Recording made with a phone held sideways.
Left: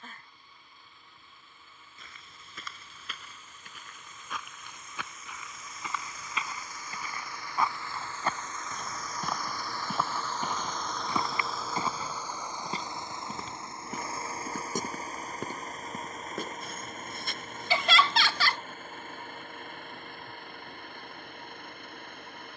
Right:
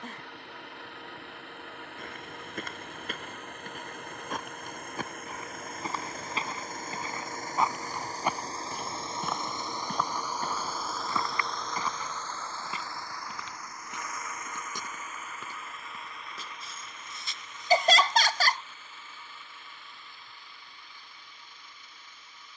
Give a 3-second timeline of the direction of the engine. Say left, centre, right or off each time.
right, right, right, centre, left, left, left, left.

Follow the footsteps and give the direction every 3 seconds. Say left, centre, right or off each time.
right, right, right, centre, left, left, left, off.